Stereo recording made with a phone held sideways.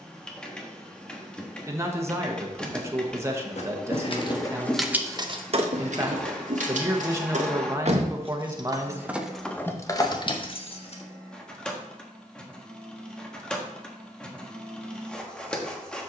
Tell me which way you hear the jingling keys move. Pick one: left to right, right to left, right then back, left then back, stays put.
right then back.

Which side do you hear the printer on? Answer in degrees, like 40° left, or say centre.
10° left.